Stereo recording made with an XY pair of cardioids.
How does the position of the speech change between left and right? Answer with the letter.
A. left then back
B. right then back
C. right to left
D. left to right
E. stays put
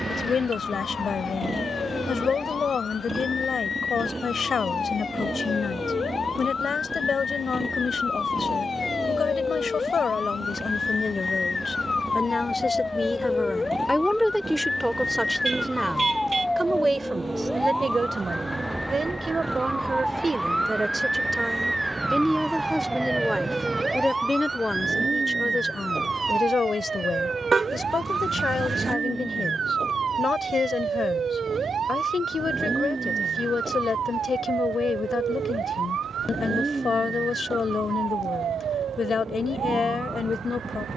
B.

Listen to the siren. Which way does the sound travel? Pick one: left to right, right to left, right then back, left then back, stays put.
left to right.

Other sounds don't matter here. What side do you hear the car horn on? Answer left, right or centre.
right.